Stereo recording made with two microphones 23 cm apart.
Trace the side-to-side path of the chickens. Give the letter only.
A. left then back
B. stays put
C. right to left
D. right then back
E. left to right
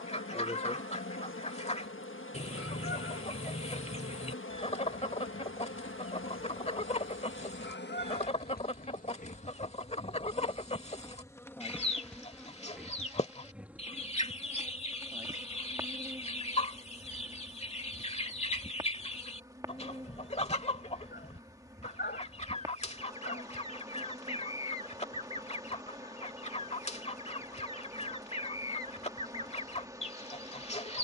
B.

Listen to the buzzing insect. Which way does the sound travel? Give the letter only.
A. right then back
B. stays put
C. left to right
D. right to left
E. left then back
C.